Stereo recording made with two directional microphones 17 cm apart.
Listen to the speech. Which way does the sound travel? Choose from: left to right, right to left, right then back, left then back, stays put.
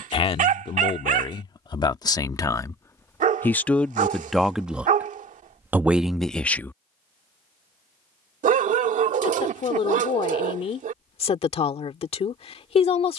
right then back.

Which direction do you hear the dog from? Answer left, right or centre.
right.